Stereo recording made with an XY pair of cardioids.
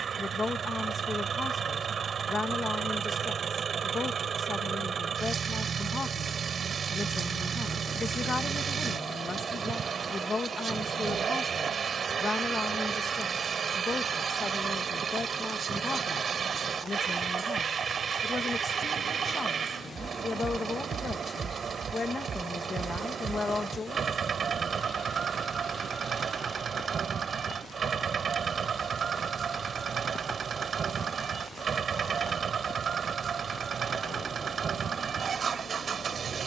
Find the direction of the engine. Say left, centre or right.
right.